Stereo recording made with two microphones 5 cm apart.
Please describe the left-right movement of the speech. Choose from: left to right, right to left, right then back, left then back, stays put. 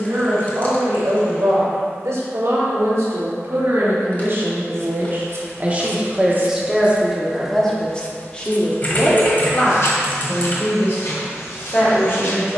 right to left.